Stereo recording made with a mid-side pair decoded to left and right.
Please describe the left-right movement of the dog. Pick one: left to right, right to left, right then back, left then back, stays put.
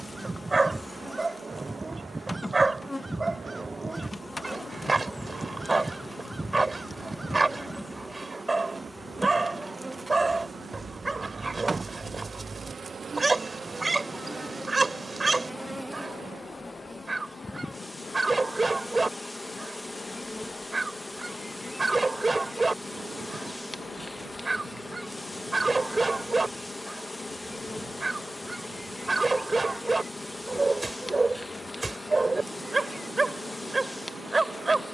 stays put.